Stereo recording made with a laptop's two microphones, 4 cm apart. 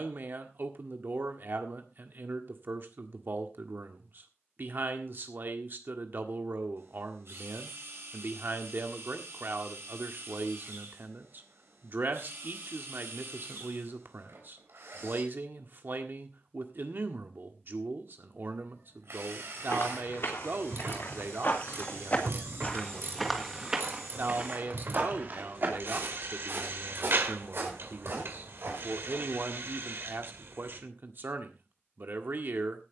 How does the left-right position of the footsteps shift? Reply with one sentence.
You can hear the footsteps go from the left side to the right.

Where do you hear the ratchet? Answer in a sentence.
You can hear the ratchet on the right.